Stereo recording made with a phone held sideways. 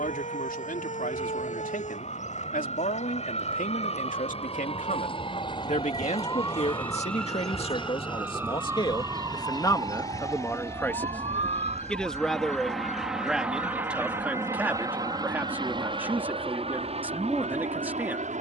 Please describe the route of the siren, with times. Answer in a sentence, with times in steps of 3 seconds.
In this clip you hear the siren on the left from 0 s, in the centre from 6 s and on the right from 9 s.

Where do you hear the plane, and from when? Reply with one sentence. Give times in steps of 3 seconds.
You can hear the plane on the left from 0 s, in the centre from 12 s and on the right from 15 s.